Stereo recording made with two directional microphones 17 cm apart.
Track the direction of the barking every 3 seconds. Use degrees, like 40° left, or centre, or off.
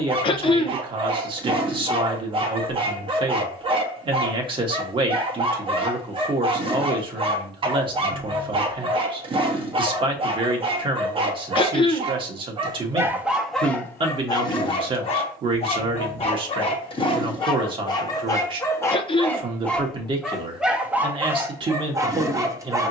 30° right, 30° right, 30° right, 30° right, centre, 30° left, 10° left, 20° right.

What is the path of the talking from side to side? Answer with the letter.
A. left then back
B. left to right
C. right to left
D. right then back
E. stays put
E.